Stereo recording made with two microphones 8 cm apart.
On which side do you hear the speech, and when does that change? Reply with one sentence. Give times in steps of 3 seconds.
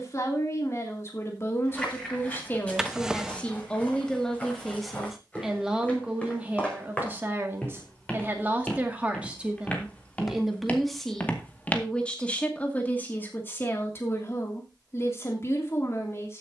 You can hear the speech on the left from 0 s, in the centre from 3 s, on the right from 6 s, in the centre from 9 s and on the left from 12 s.